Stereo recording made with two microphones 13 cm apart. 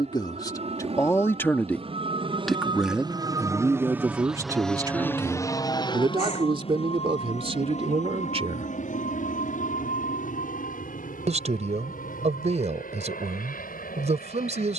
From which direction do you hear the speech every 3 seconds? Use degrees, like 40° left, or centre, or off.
20° left, 30° right, 50° right, 60° right, 60° right.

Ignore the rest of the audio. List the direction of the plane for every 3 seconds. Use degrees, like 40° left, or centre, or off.
60° right, centre, 50° left, 70° left, 80° left.